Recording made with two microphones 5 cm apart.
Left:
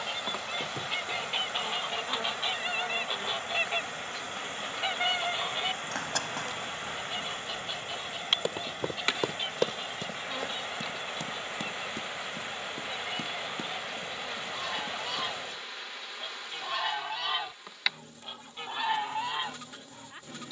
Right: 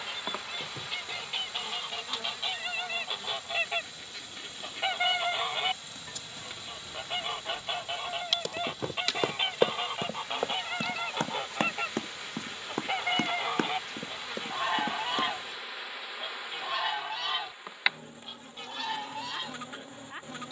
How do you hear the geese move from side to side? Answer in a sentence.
You can hear the geese move from left to right and back again.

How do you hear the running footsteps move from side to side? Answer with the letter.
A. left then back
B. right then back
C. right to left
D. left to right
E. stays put
D.